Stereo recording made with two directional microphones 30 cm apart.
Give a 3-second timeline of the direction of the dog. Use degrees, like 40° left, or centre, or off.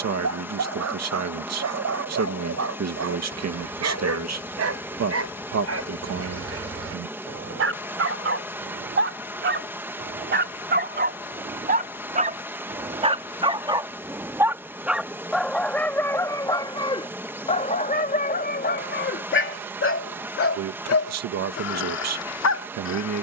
60° right, 50° right, 50° right, 30° right, 20° right, 10° left, 40° left, 60° left.